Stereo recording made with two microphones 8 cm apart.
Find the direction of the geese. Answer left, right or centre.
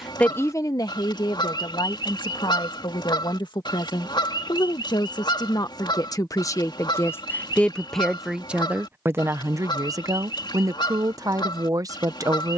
left.